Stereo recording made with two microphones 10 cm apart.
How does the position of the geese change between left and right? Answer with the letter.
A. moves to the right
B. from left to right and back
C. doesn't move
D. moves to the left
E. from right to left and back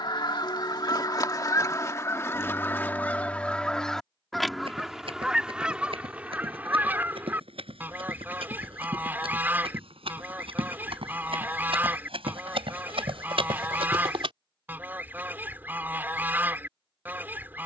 A.